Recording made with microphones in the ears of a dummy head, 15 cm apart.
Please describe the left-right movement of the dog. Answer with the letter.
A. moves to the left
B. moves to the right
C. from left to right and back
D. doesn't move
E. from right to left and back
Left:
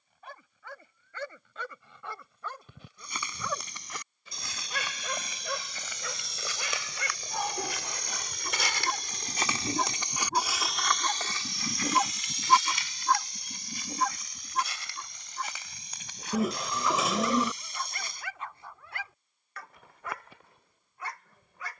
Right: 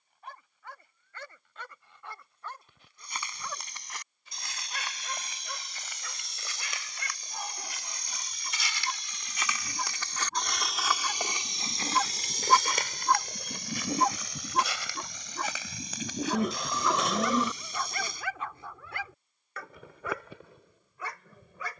B.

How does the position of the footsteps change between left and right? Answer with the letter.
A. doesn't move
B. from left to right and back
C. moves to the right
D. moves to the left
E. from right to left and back
C.